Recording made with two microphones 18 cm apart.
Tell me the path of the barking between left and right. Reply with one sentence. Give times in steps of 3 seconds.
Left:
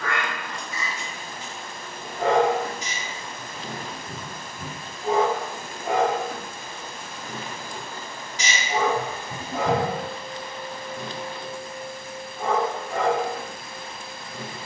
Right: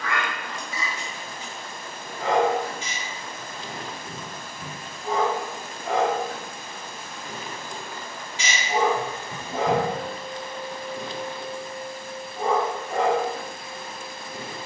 In this clip you hear the barking on the left from 0 s, in the centre from 6 s and on the right from 9 s.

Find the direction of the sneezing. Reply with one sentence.
You can hear the sneezing on the left.